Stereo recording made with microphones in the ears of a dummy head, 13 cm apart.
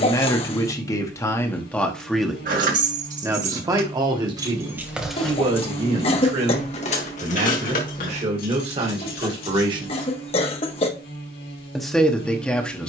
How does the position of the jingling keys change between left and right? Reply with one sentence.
You can hear the jingling keys travel towards the left.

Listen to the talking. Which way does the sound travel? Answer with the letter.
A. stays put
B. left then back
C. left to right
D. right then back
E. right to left
D.